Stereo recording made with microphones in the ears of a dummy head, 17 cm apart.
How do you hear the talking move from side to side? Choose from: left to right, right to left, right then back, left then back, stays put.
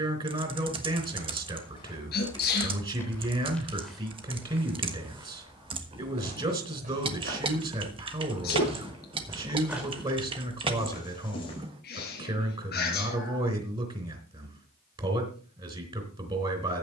stays put.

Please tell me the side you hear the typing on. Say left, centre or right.
right.